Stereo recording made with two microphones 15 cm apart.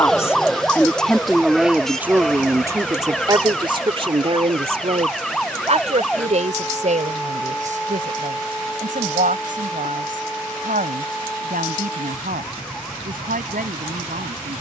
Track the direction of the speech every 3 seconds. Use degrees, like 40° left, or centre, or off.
10° right, 40° right, 60° right, 60° right, 70° right.